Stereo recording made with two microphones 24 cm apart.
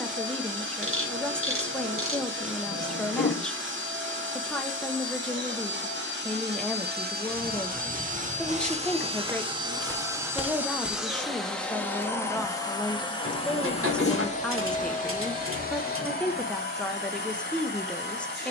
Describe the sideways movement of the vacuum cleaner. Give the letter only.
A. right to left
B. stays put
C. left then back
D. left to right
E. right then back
A.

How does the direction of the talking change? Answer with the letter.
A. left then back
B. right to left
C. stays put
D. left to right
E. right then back
C.